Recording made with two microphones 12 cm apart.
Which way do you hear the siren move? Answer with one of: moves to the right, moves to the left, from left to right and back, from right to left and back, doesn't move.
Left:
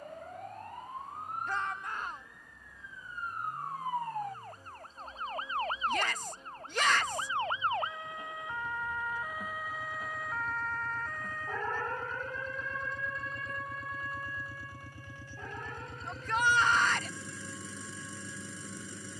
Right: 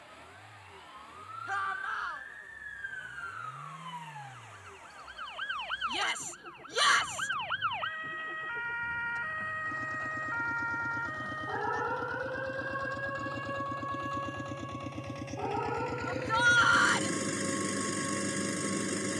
moves to the right.